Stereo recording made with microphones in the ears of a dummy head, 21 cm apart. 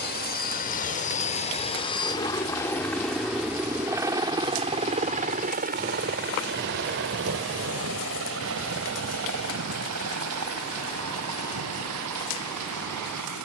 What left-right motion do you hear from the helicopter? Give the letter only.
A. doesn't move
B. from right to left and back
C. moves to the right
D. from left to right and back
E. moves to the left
C.